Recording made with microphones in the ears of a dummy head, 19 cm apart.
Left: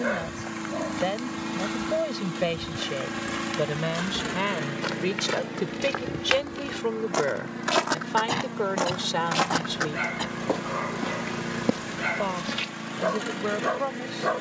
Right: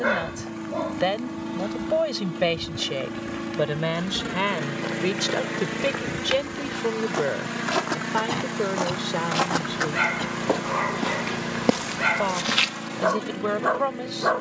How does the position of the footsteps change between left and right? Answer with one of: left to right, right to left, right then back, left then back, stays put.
left to right.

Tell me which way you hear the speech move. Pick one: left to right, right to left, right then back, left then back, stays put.
left then back.